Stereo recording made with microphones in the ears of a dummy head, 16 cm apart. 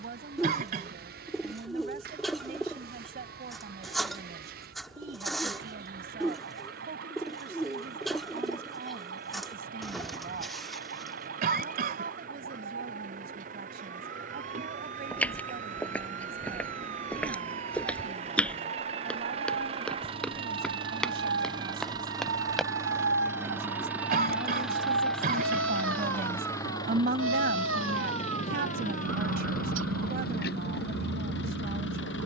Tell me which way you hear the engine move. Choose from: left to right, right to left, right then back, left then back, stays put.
right to left.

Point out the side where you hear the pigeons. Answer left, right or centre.
centre.